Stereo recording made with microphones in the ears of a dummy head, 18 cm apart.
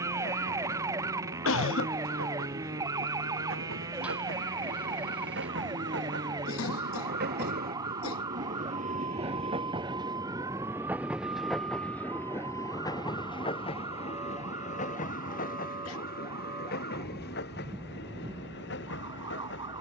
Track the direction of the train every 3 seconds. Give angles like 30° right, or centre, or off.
70° right, 70° right, 50° right, 10° right, 20° left, 50° left, 60° left.